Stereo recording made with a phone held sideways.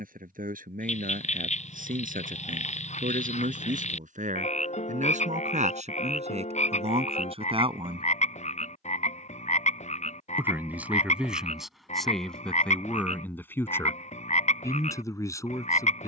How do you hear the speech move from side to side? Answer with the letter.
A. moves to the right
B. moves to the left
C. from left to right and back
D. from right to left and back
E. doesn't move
B.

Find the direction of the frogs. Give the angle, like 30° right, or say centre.
50° left.